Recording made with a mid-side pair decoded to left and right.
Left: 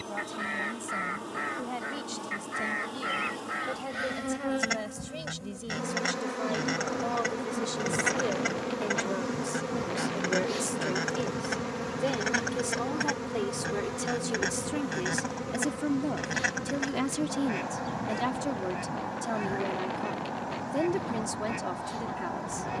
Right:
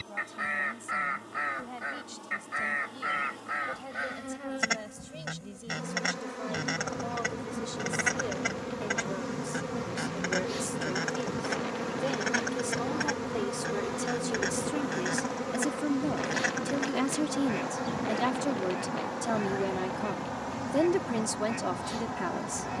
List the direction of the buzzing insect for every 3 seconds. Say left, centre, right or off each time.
left, left, left, centre, centre, right, right, right.